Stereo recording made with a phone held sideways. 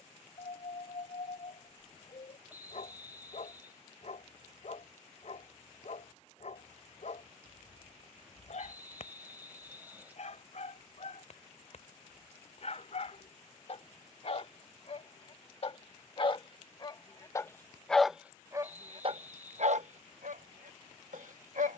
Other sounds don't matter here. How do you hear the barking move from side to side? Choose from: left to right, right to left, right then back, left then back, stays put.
left to right.